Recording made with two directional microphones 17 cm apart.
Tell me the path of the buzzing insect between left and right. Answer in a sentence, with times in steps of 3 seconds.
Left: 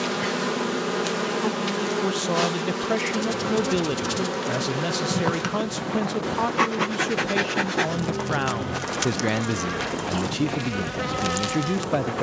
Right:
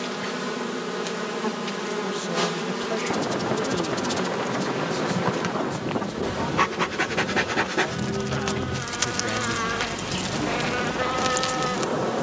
In this clip you hear the buzzing insect on the left from 0 s and in the centre from 6 s.